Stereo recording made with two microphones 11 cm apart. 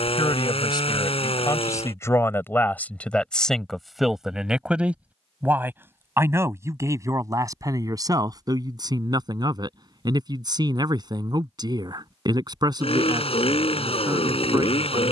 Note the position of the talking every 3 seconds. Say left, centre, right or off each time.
left, centre, right, right, right.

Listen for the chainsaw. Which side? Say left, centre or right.
left.